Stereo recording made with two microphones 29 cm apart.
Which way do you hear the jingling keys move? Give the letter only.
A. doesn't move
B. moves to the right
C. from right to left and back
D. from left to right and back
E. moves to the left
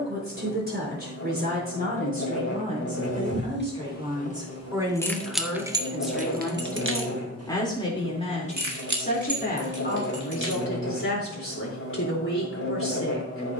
B.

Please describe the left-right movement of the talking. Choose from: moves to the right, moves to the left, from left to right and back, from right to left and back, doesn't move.
moves to the left.